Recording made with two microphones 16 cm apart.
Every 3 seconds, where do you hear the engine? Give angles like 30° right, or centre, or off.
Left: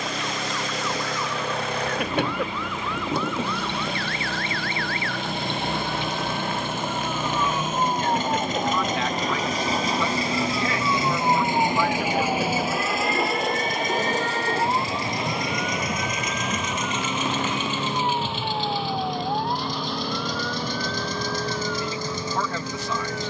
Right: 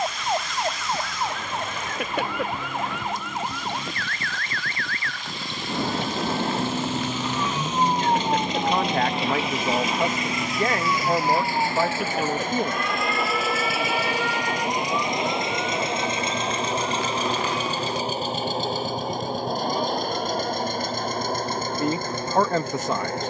80° left, 70° left, 60° left, 30° left, centre, 30° right, 50° right, 50° right.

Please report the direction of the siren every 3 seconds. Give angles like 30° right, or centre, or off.
60° right, 50° right, 30° right, centre, 40° left, 60° left, 70° left, 70° left.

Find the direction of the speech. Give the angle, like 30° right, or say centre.
50° right.